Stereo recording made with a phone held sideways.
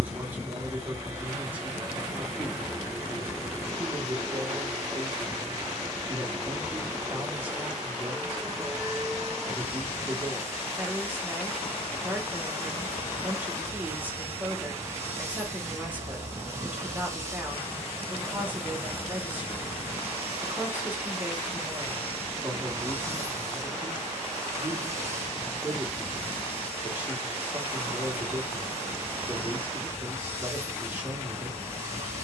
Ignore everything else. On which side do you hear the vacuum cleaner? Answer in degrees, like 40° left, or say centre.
20° right.